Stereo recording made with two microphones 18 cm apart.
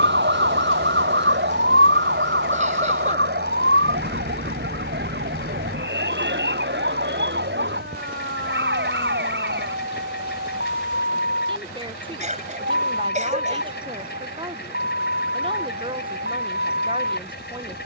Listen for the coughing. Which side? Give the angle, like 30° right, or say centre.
40° right.